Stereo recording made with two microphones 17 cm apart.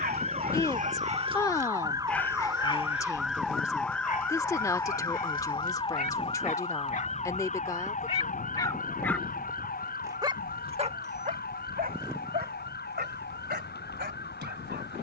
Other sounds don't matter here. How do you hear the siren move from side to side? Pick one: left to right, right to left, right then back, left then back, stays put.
right to left.